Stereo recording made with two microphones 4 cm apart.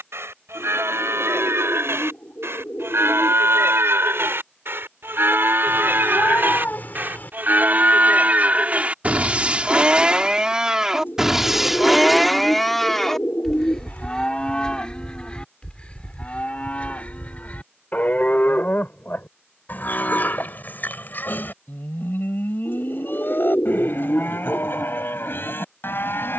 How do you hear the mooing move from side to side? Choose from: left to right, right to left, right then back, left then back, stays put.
right to left.